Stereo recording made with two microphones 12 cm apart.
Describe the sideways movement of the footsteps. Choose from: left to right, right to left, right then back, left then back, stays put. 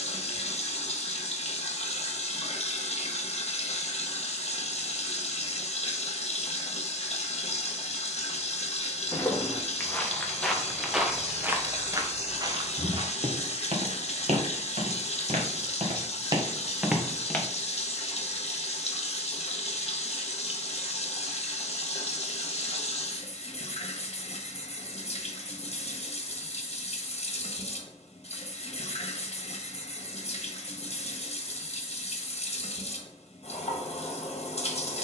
right then back.